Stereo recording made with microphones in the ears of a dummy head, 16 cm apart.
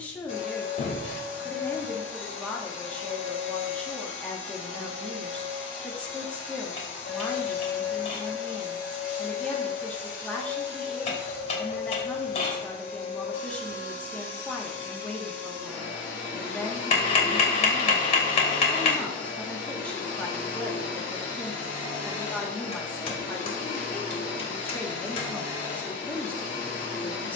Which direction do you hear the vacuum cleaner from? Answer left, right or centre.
left.